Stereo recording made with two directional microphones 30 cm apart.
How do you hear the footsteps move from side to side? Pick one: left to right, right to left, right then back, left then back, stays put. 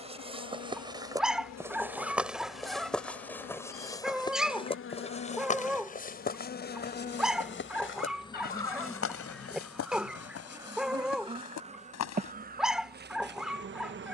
right to left.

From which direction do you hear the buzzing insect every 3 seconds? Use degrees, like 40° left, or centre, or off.
60° left, 40° left, 20° left, 10° right, 30° right.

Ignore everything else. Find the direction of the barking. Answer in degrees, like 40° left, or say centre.
centre.